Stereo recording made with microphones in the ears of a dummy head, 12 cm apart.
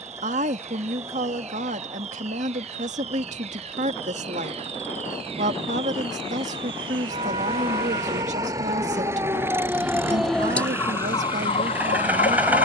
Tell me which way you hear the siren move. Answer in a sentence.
You can hear the siren travel towards the left.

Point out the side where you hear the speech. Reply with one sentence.
In this clip you hear the speech on the right.